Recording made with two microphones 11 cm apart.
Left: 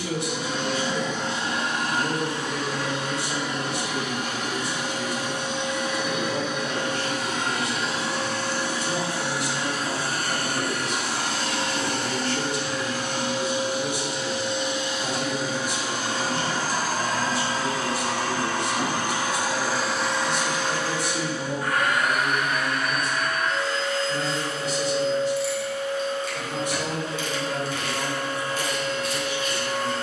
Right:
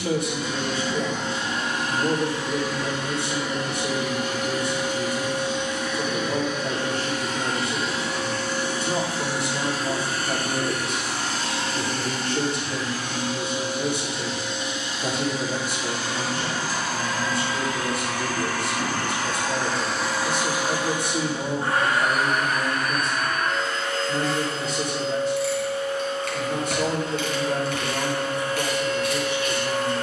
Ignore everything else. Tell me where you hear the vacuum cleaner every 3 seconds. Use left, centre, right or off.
left, left, left, left, left, left, centre, right, right, right.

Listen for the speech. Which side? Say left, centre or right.
right.